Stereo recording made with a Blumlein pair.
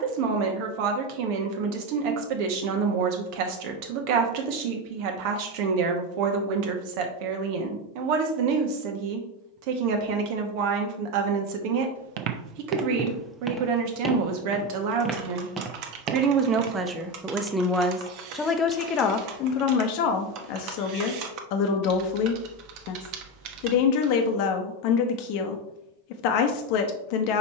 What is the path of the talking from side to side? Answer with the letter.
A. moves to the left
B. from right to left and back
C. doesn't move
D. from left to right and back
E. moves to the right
A.